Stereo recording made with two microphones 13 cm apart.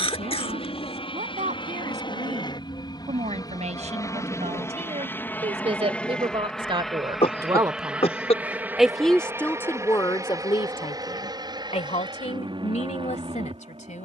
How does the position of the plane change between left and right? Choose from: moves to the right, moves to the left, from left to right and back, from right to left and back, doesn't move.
moves to the right.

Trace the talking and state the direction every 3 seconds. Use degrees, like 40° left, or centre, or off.
70° right, 60° right, 30° right, 30° left, 60° left.